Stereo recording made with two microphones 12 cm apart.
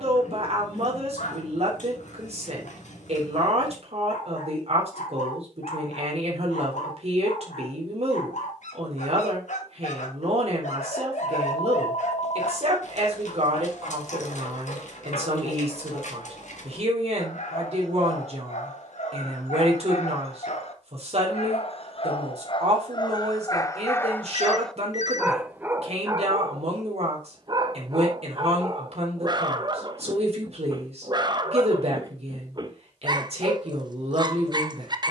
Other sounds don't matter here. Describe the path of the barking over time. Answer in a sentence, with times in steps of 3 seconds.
You can hear the barking on the left from 0 s, in the centre from 24 s and on the right from 27 s.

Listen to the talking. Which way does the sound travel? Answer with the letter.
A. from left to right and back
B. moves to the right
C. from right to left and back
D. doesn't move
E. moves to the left
D.